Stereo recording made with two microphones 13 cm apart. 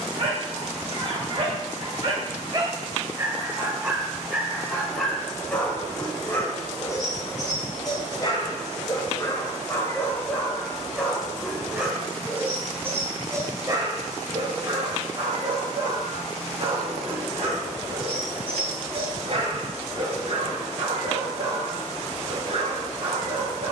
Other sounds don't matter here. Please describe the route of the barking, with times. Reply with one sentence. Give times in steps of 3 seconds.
You can hear the barking on the right from 0 s, in the centre from 3 s, on the left from 6 s, in the centre from 9 s and on the right from 12 s.